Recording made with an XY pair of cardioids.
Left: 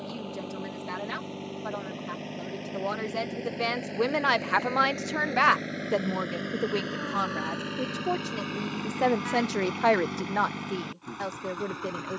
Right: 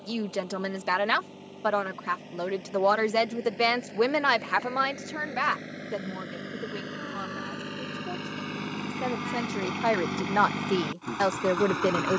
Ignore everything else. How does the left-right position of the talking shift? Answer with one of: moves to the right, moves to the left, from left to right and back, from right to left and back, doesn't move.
from right to left and back.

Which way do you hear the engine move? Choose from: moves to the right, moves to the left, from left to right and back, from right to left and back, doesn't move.
moves to the right.